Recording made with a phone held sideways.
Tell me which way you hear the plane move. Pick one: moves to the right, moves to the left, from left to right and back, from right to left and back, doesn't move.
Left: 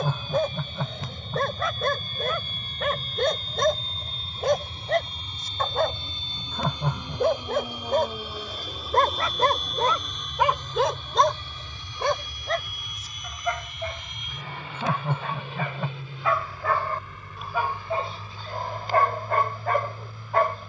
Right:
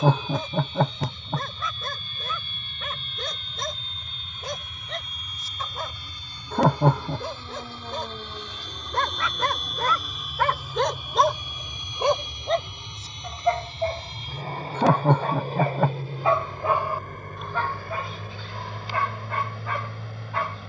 moves to the right.